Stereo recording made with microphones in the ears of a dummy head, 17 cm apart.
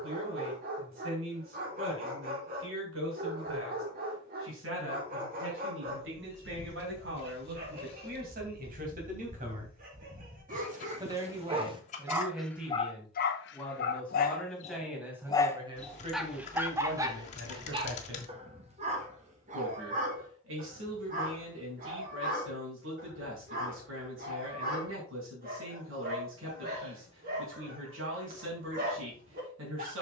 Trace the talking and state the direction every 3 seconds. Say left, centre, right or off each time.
right, right, right, right, centre, right, right, right, right, right.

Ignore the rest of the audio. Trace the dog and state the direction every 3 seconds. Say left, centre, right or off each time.
right, right, right, right, left, centre, right, right, right, right.